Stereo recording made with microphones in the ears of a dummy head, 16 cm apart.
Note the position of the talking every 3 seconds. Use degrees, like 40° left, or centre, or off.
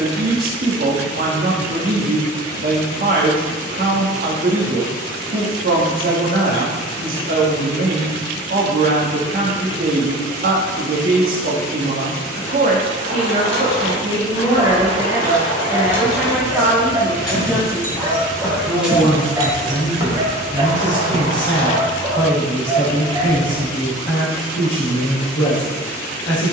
50° right, 50° right, 50° right, 50° right, 30° right, centre, 20° left, 30° left, 30° left.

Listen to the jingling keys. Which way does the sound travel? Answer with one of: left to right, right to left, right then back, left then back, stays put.
left to right.